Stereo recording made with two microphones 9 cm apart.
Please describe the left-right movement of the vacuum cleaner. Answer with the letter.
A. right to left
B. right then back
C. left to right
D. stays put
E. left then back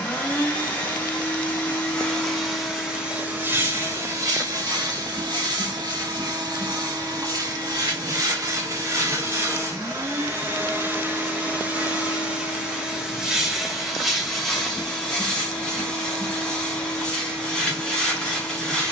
B.